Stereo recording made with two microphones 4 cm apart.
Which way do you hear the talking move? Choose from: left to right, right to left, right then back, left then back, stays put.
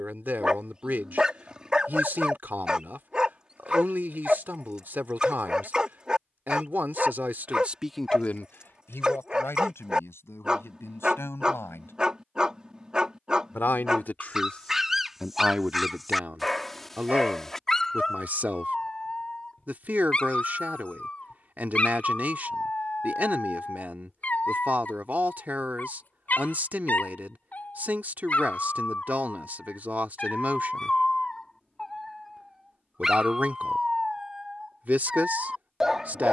left then back.